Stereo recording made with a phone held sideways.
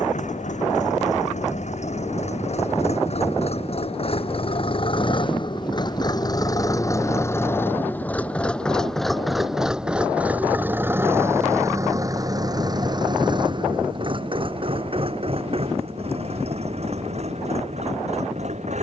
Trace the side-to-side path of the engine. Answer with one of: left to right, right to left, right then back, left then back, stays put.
left to right.